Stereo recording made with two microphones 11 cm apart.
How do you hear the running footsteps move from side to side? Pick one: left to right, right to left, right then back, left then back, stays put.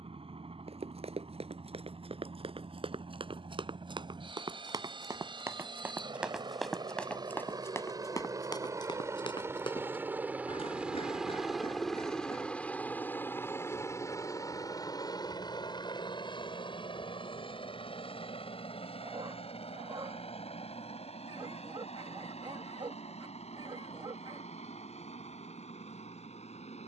right to left.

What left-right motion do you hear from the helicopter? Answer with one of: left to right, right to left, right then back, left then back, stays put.
right to left.